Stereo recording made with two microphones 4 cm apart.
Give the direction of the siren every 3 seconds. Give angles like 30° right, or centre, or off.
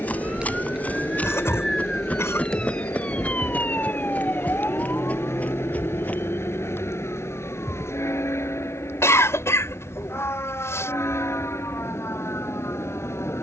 centre, 40° left, 60° left, 70° left, 70° left.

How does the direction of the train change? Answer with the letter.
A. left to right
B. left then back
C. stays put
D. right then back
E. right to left
C.